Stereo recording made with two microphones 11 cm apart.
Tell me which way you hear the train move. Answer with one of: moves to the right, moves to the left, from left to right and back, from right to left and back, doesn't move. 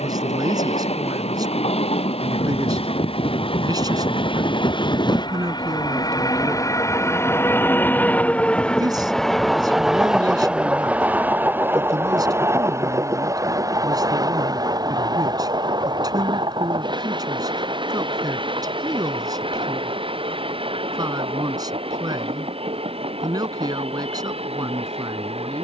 moves to the right.